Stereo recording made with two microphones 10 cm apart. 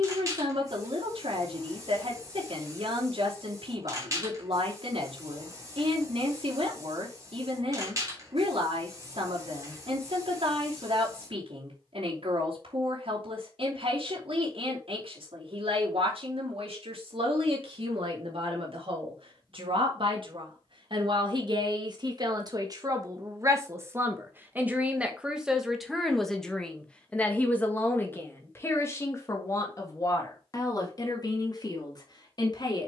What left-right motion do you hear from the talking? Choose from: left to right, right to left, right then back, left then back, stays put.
right to left.